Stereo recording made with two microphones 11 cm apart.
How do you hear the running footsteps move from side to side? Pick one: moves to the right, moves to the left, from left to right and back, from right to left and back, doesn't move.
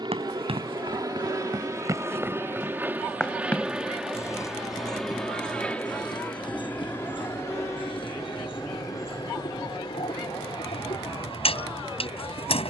moves to the left.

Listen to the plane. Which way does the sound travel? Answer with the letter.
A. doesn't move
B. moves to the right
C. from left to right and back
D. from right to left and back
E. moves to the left
E.